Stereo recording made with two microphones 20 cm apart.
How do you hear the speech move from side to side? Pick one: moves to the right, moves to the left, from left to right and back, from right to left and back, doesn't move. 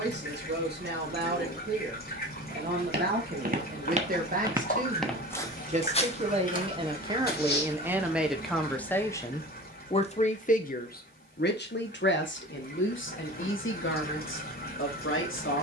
moves to the left.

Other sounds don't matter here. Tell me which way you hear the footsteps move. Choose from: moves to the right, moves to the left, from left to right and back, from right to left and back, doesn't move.
moves to the left.